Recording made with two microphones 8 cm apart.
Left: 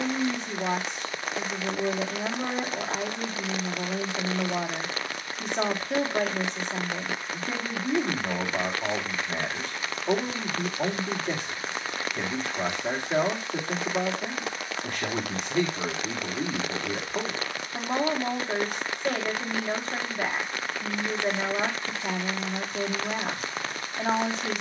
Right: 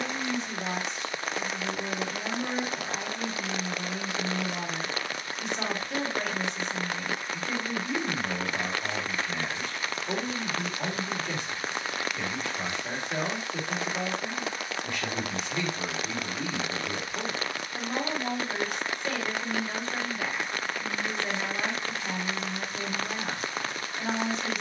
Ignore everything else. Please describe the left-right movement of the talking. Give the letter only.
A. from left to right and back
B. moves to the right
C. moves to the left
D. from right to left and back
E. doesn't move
E.